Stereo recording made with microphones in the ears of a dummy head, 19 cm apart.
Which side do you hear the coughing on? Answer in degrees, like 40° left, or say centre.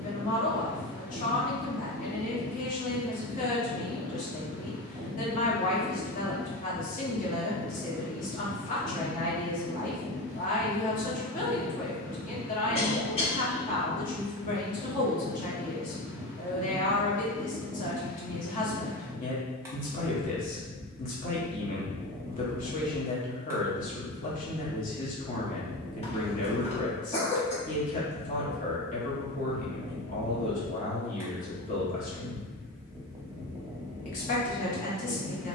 30° left.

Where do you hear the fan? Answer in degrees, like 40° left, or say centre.
10° right.